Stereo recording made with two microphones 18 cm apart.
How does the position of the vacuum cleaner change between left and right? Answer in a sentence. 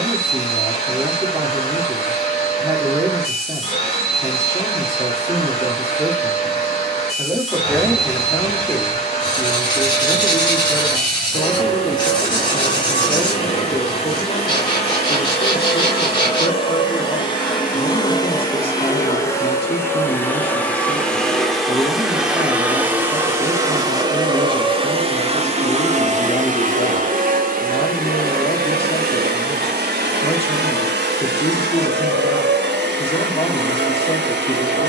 You can hear the vacuum cleaner move to the right.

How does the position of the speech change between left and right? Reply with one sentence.
You can hear the speech go from the right side to the left.